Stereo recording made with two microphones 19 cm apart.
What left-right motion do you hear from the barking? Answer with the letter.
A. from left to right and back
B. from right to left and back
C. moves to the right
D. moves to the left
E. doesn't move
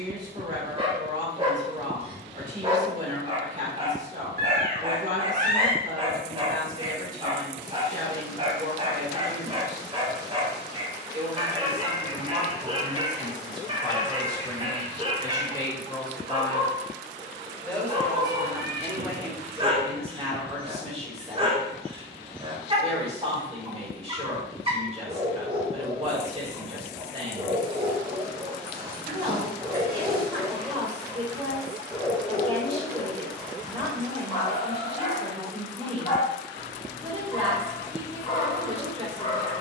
D.